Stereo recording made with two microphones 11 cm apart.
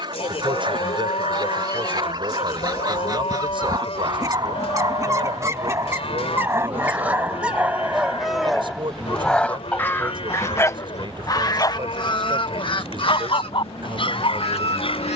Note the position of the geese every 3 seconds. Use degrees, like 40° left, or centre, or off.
40° right, 30° right, 10° right, 30° left, 60° left.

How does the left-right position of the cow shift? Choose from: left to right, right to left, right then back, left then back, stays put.
stays put.